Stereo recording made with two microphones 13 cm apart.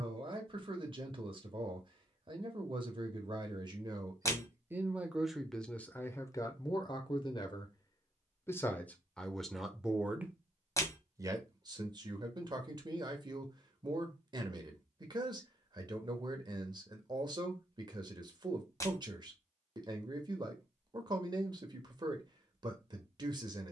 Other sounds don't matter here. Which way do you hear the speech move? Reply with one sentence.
In this clip you hear the speech move from right to left and back again.